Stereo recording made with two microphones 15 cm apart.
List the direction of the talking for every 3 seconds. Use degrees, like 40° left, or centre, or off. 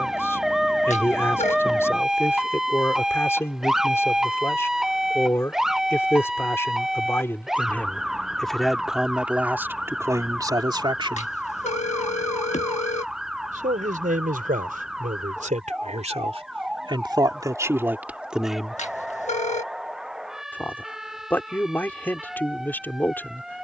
20° left, 20° left, 10° left, 20° right, 60° right, 40° right, centre, 10° left.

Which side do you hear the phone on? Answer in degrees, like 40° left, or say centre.
50° left.